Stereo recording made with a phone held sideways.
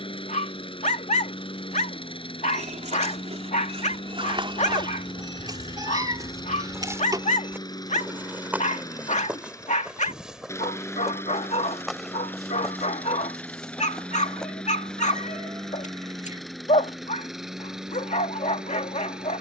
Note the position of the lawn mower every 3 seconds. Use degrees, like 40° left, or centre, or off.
40° left, 30° left, 30° left, 20° left, 10° left, centre, centre.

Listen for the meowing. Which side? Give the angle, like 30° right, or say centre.
30° right.